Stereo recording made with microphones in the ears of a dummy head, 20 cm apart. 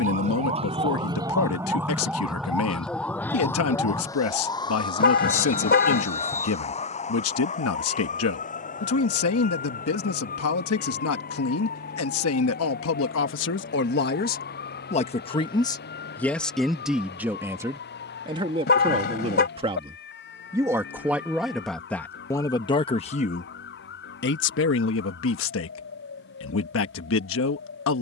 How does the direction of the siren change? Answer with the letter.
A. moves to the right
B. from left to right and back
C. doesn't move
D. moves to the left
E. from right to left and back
D.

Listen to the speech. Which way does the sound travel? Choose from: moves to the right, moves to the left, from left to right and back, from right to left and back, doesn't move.
from left to right and back.